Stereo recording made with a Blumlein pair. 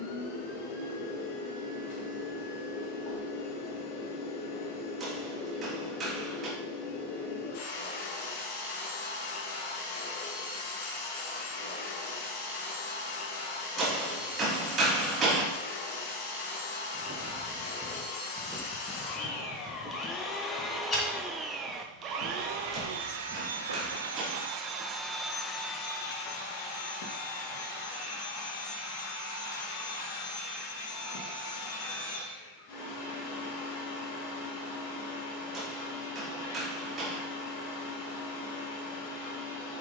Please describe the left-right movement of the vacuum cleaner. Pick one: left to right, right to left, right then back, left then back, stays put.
right then back.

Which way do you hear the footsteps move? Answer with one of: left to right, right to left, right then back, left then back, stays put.
right to left.